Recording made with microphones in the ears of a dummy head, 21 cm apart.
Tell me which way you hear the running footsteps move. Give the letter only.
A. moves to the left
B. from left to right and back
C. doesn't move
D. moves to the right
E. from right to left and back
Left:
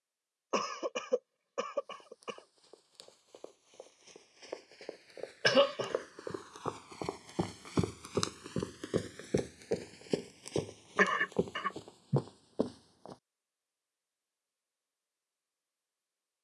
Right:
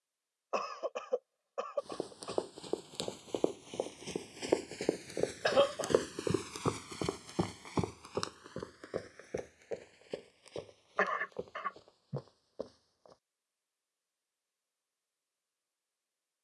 A.